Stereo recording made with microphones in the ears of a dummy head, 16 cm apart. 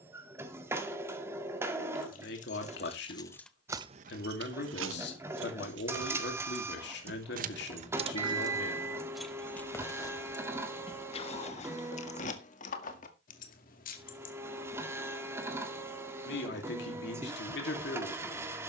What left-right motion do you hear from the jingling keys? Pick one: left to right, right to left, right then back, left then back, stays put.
right then back.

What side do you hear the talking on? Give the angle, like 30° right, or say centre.
70° left.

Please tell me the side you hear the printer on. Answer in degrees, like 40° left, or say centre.
10° right.